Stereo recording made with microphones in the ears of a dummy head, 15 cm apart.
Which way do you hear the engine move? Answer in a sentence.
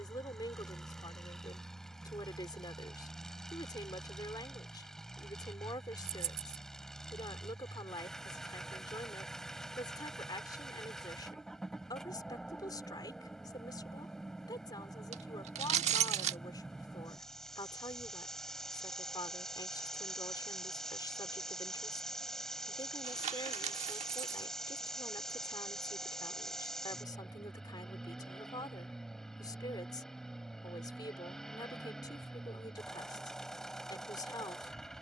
You can hear the engine stay put.